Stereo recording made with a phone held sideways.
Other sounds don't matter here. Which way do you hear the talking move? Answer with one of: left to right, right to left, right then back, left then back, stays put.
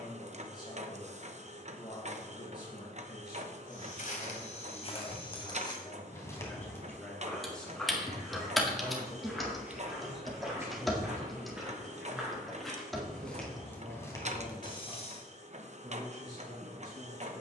left to right.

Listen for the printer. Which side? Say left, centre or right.
right.